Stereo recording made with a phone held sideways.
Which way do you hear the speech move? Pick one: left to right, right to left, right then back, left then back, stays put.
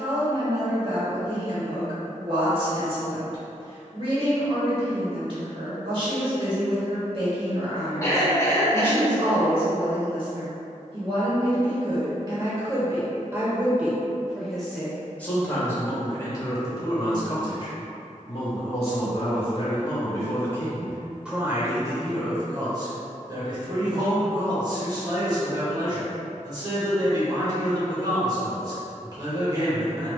left then back.